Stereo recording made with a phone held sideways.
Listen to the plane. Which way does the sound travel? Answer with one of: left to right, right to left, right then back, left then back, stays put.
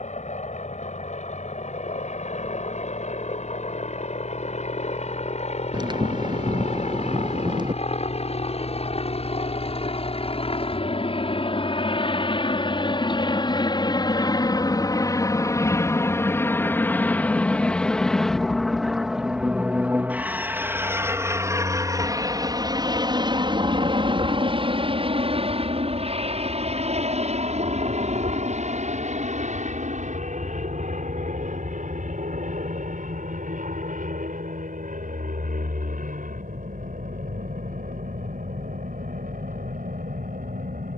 left to right.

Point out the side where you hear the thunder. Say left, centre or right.
right.